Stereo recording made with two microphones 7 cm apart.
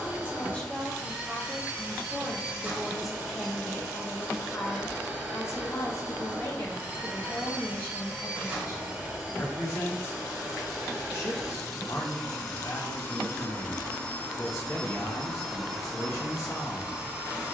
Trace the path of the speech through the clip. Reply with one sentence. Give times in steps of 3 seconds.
You can hear the speech in the centre from 0 s and on the left from 3 s.